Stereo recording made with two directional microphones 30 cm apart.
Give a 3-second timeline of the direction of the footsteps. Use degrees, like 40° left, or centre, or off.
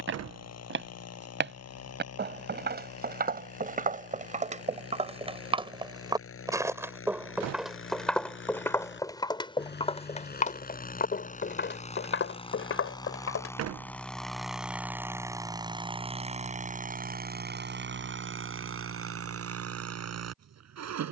40° right, 20° right, centre, 20° left, 40° left, off, off.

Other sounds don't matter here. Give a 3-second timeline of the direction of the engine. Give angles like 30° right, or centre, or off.
60° left, 50° left, 40° left, 30° left, 10° left, 20° right, 50° right.